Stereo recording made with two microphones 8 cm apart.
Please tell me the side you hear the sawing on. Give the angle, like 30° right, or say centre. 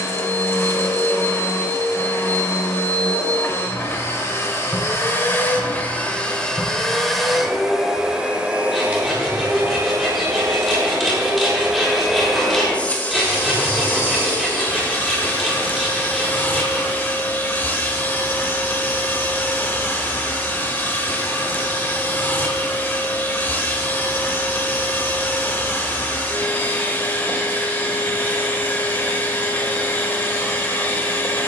centre.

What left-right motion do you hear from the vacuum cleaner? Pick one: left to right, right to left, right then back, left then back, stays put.
right then back.